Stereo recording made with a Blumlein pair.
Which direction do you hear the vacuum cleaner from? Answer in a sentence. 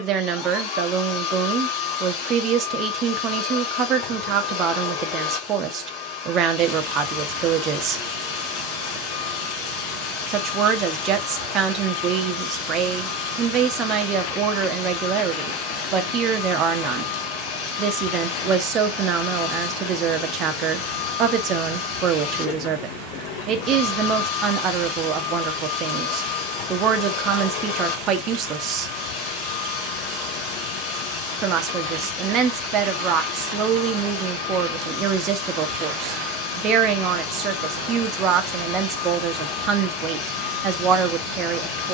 In this clip you hear the vacuum cleaner on the left.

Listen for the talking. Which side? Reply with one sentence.
You can hear the talking on the right.